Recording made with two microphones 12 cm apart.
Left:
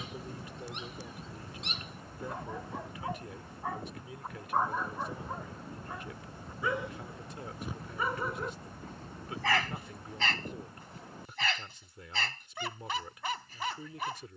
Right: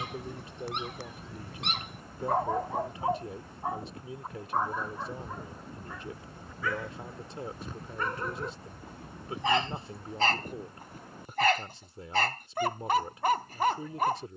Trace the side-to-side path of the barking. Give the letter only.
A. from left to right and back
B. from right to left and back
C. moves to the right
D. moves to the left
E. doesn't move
B.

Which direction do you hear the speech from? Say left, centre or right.
right.